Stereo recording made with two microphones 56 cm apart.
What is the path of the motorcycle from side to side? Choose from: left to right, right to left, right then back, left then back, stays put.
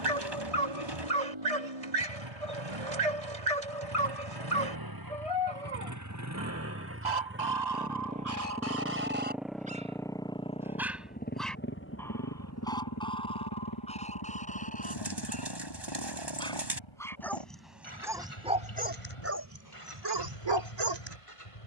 right to left.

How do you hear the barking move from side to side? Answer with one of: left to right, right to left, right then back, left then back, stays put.
left then back.